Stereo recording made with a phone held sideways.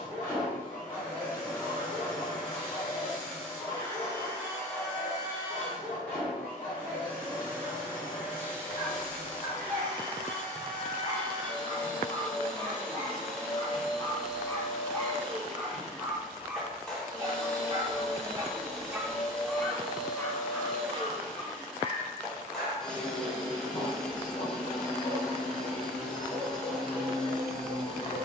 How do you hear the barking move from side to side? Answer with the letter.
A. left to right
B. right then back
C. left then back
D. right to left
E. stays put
B.